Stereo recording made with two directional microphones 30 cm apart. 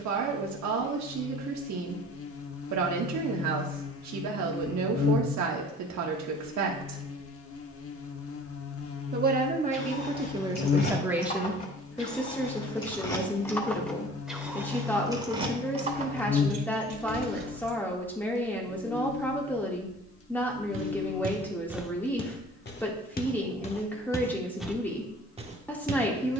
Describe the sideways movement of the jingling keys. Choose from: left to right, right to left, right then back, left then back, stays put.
left to right.